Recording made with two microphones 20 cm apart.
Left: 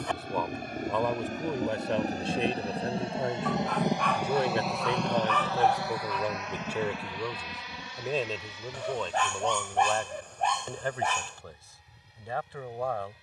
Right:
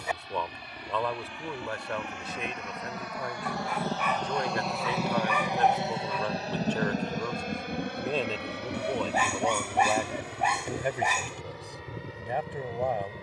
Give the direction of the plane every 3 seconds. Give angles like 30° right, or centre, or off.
50° left, centre, 40° right, 70° right, 70° right.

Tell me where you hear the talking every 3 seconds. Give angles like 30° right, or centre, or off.
20° left, 20° left, 10° left, 10° right, 20° right.